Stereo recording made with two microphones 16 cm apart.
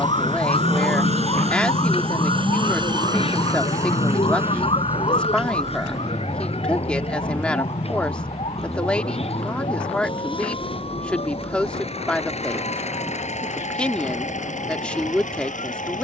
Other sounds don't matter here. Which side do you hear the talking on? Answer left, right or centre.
centre.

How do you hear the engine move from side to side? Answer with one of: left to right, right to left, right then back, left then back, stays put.
right to left.